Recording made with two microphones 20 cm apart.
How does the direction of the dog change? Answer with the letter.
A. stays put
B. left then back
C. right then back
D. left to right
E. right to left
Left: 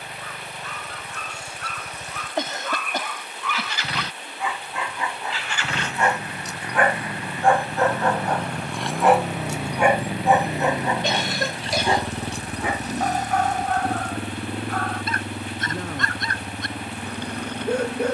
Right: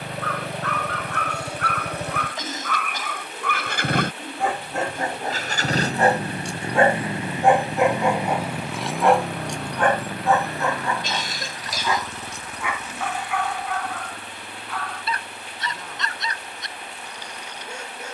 E.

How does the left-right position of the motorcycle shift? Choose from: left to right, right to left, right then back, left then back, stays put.
right to left.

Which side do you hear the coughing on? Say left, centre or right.
left.